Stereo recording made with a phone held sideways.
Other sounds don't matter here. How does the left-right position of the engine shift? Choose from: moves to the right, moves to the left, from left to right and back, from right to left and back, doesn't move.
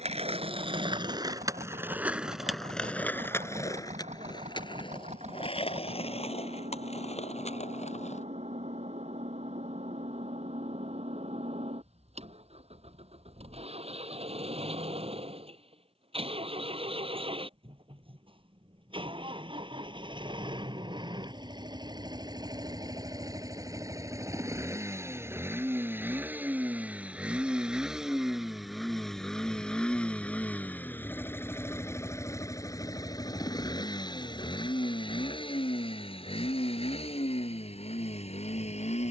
moves to the left.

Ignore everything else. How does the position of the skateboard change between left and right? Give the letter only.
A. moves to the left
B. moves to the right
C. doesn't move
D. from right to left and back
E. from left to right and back
A.